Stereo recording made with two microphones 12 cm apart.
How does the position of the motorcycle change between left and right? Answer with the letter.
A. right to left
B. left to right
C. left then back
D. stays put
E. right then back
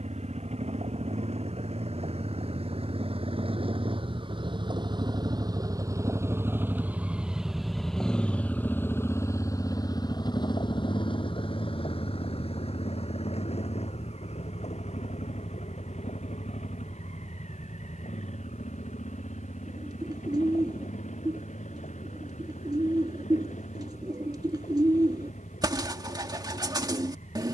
A.